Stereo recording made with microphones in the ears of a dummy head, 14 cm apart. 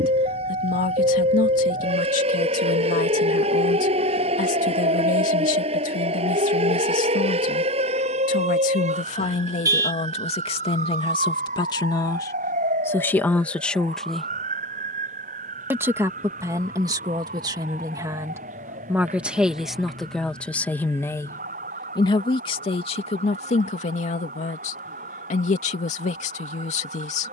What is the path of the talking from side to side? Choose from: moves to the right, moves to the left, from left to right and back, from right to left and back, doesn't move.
from left to right and back.